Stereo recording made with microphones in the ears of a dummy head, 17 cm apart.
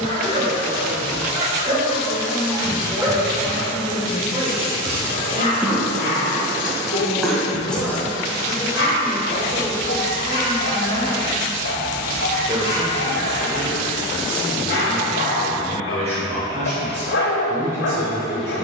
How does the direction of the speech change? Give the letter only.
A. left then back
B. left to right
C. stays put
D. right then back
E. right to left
A.